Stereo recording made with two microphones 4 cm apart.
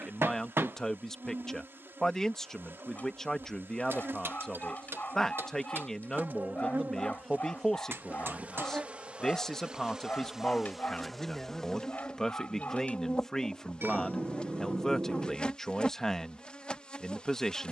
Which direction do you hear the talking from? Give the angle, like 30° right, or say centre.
10° left.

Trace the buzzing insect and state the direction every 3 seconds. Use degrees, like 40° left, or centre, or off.
60° right, 60° right, 50° right, 10° right, 20° left, 20° left.